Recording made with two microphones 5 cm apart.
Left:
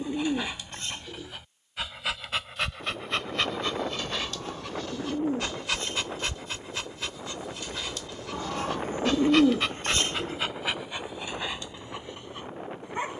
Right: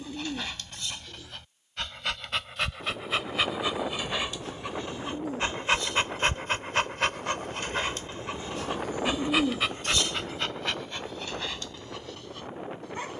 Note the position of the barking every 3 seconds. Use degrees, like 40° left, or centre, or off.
10° left, 20° right, 40° right, 10° left, 20° left.